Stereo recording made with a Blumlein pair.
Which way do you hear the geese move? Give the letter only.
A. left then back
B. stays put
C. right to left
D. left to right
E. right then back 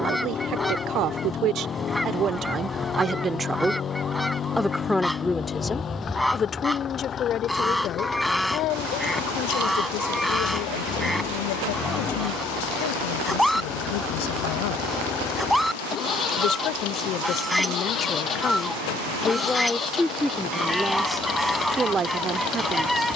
B.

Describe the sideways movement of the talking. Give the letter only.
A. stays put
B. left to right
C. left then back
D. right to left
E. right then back
C.